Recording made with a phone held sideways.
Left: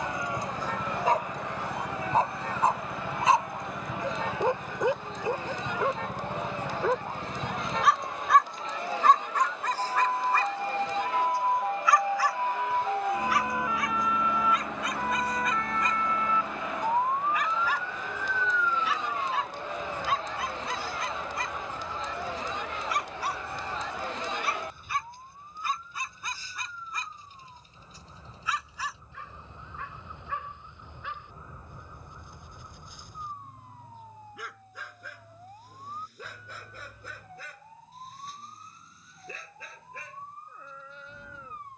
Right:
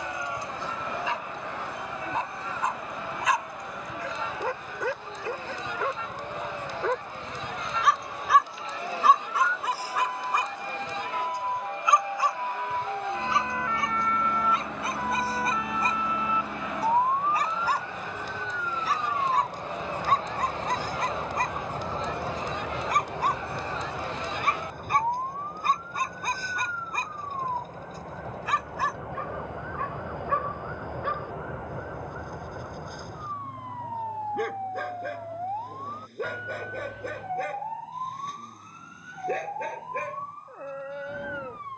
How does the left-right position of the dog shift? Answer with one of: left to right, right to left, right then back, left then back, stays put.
left to right.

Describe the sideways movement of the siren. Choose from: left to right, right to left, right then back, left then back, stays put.
left to right.